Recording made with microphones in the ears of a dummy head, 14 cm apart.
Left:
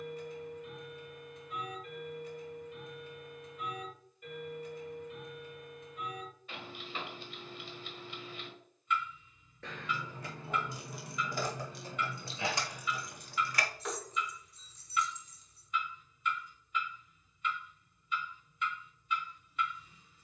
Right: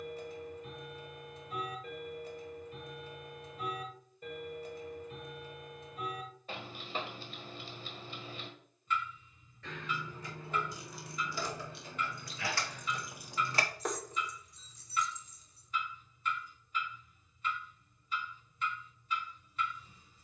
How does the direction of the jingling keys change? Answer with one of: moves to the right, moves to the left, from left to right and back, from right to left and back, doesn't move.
moves to the right.